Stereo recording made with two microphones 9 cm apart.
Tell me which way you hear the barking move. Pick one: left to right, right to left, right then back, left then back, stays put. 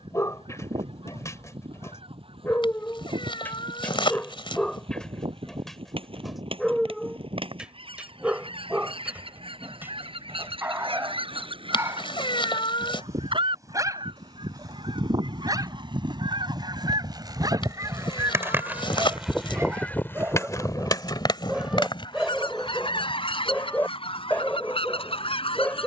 right then back.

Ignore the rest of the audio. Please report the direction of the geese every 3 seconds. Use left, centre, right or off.
right, right, right, right, right, right, centre, left, left.